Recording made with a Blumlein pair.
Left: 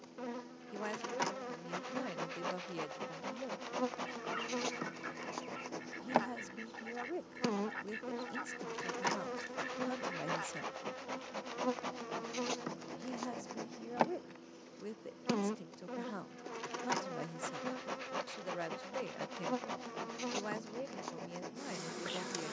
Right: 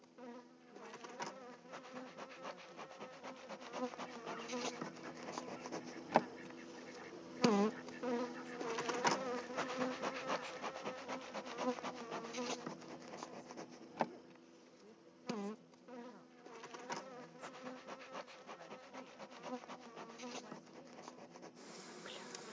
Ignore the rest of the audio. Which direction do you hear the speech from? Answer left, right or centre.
left.